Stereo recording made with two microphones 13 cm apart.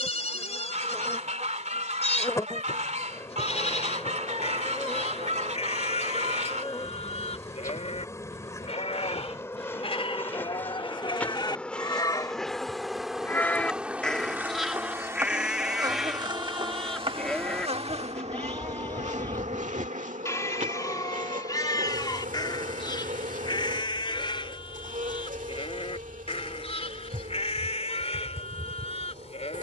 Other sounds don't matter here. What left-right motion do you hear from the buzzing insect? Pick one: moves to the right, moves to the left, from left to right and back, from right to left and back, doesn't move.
moves to the right.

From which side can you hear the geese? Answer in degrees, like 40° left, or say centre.
60° right.